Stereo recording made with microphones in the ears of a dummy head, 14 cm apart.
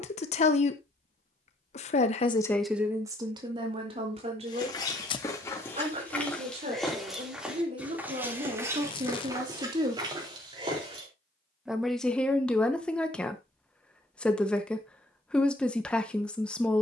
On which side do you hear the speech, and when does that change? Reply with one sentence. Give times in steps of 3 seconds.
In this clip you hear the speech on the left from 0 s, on the right from 3 s and in the centre from 12 s.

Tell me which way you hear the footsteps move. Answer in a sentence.
You can hear the footsteps move to the right.